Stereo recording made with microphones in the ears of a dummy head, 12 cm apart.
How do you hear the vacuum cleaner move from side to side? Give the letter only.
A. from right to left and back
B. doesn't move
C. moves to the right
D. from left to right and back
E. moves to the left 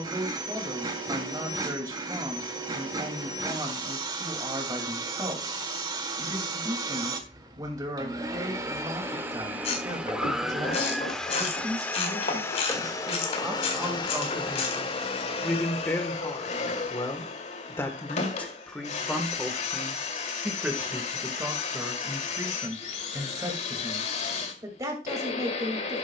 E.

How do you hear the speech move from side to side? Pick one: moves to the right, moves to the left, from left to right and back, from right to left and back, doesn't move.
from right to left and back.